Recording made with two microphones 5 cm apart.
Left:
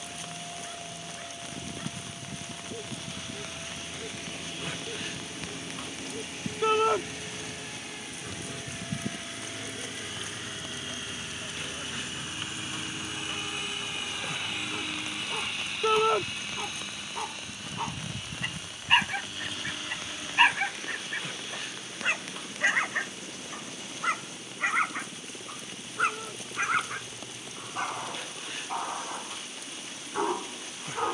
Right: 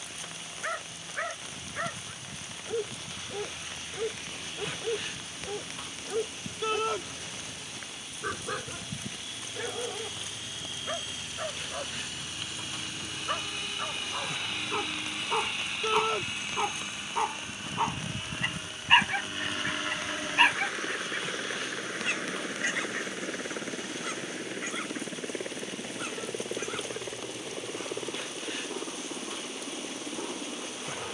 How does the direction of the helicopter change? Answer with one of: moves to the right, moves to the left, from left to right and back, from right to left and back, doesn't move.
moves to the right.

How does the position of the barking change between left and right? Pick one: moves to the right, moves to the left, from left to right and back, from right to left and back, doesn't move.
moves to the left.